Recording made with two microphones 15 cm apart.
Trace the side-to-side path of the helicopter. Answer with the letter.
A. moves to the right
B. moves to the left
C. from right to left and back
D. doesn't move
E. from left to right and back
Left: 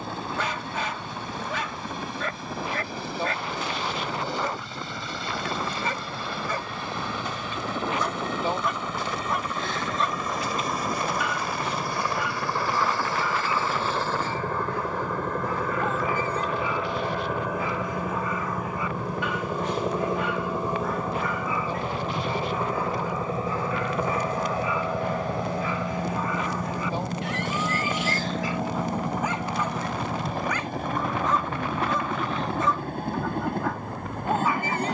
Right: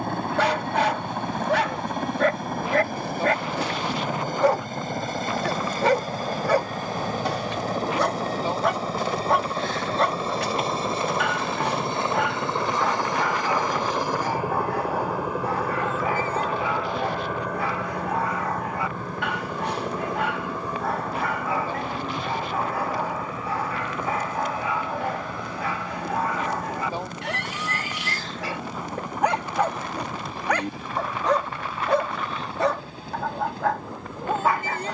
B.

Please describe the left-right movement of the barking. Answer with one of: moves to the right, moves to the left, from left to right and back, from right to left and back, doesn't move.
doesn't move.